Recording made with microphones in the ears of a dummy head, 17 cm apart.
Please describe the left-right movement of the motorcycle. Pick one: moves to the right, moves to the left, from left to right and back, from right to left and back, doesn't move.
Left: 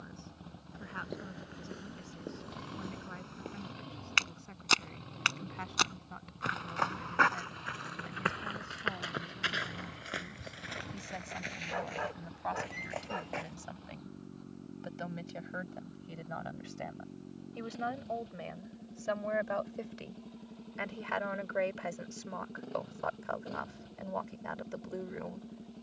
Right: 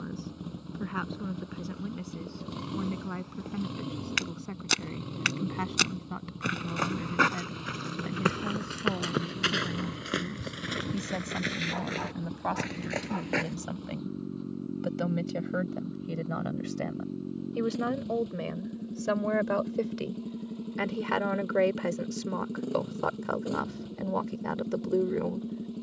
doesn't move.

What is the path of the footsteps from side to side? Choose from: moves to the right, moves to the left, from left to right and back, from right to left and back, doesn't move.
moves to the right.